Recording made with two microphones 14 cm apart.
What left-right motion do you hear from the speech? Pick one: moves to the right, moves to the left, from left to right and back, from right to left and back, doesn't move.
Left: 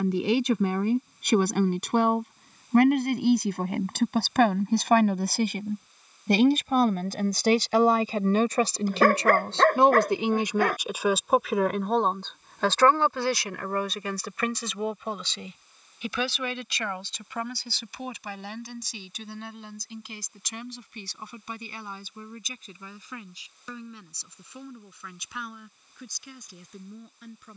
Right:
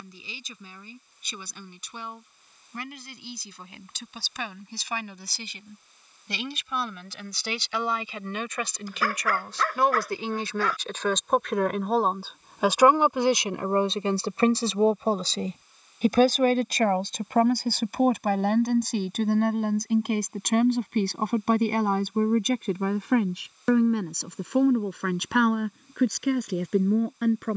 moves to the right.